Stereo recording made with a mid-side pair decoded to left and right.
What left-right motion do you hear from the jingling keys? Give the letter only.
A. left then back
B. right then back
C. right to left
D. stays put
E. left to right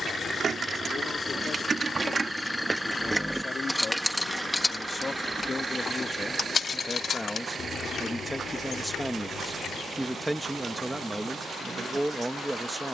C.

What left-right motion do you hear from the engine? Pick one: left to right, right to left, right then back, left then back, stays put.
left to right.